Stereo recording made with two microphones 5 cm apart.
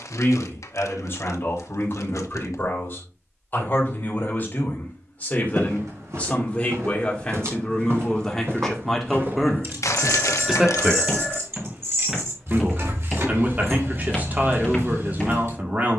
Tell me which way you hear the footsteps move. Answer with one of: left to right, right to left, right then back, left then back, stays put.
right to left.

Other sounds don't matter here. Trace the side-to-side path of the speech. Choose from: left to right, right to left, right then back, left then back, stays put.
left to right.